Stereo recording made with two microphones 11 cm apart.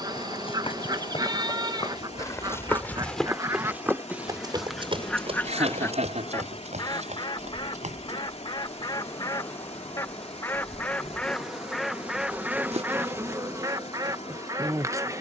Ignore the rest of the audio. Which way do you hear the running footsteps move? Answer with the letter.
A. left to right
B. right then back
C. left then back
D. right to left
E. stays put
A.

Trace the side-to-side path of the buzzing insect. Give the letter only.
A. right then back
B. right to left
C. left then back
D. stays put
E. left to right
C.